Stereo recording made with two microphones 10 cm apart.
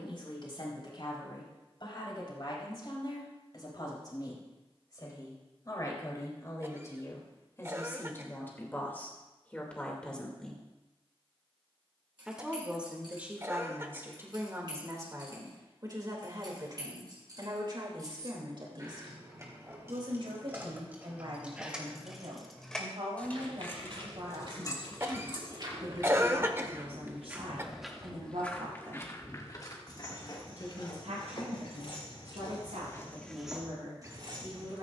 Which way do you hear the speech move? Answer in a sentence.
You can hear the speech move to the right.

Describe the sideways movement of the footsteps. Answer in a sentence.
In this clip you hear the footsteps move from right to left and back again.